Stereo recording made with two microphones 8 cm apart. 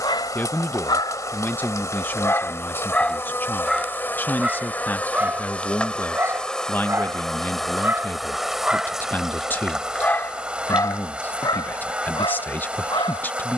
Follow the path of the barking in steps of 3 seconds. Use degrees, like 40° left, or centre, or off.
50° left, 10° right, 20° right, 40° left, 80° left.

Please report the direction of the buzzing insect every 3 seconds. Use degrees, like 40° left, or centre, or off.
40° left, 20° left, centre, 10° right, 10° right.